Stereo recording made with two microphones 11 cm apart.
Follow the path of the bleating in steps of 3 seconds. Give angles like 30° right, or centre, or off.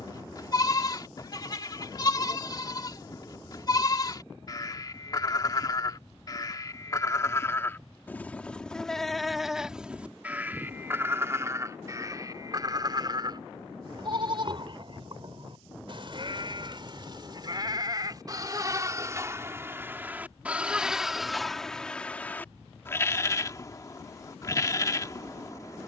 40° left, 40° left, 20° left, 20° right, 40° right, 50° right, 20° right, 20° left, 30° left.